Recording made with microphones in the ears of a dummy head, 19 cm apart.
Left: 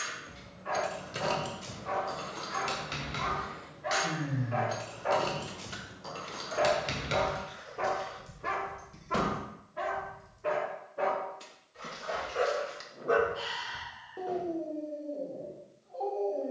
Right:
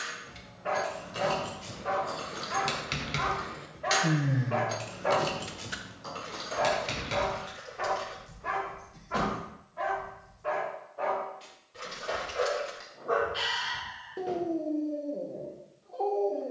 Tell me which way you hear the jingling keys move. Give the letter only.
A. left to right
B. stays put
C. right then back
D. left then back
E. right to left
C.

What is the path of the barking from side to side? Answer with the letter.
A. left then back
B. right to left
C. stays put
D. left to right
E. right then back
A.